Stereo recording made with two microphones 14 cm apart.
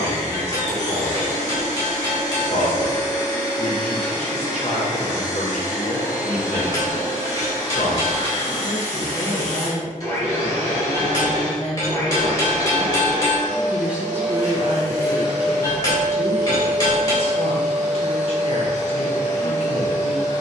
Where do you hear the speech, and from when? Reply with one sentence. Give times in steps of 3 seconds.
You can hear the speech on the left from 0 s, in the centre from 12 s and on the left from 15 s.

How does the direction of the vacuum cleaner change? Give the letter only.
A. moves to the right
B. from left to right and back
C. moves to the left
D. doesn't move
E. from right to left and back
D.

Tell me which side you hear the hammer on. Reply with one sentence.
In this clip you hear the hammer on the left.